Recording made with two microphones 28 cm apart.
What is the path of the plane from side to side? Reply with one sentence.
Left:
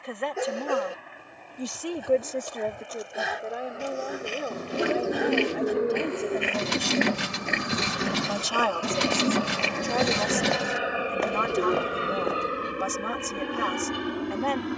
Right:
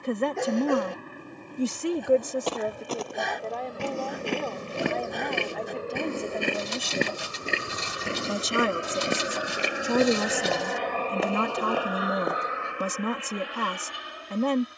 In this clip you hear the plane go from the right side to the left.